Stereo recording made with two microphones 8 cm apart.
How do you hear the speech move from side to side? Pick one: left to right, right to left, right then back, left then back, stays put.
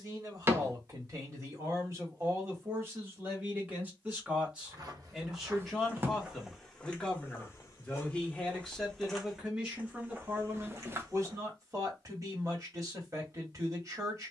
left then back.